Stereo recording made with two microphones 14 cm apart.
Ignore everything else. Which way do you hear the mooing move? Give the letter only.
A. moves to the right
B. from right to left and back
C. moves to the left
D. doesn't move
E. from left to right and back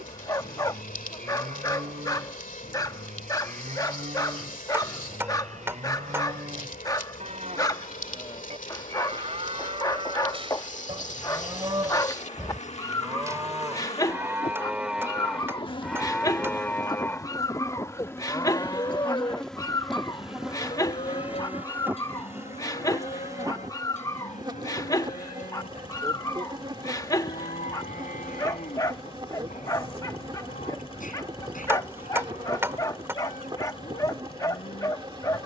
C.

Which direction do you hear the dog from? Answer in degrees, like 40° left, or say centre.
30° left.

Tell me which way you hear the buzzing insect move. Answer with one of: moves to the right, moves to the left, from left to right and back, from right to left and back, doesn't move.
moves to the right.